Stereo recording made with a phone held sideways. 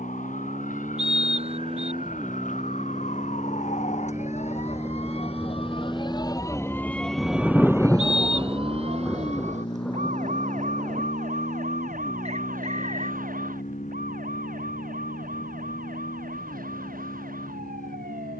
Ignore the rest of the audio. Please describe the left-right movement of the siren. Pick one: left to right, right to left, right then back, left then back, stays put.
left to right.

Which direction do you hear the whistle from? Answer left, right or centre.
right.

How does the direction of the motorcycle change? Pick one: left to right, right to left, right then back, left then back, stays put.
right to left.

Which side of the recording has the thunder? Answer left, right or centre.
centre.